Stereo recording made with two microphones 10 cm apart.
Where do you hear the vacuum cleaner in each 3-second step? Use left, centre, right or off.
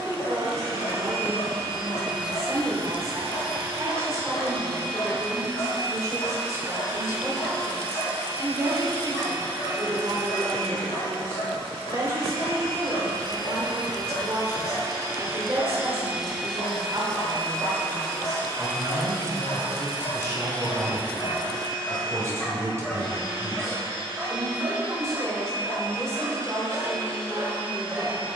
right, right, right, right, right, centre, left, left, left, left.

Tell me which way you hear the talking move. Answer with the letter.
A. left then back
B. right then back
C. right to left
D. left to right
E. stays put
E.